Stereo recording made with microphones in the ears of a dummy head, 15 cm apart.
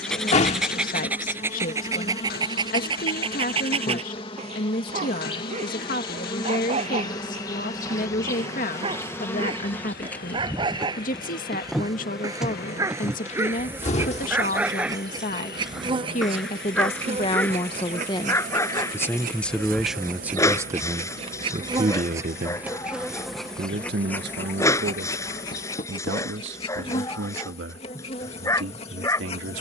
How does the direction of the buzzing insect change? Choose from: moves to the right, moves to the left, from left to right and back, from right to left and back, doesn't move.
from left to right and back.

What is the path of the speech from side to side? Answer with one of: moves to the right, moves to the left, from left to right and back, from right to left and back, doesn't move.
moves to the right.